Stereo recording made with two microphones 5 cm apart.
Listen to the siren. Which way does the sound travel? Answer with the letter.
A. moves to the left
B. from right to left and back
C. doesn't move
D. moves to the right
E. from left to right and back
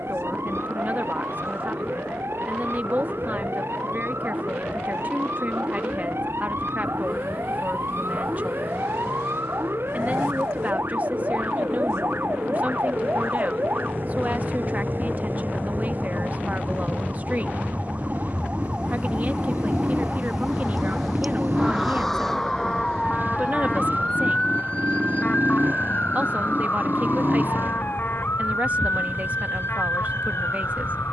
A.